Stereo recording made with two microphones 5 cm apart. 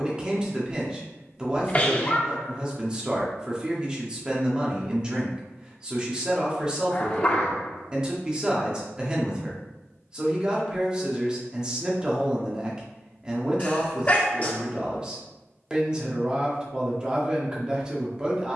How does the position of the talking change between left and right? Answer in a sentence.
In this clip you hear the talking stay put.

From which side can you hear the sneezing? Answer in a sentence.
In this clip you hear the sneezing on the left.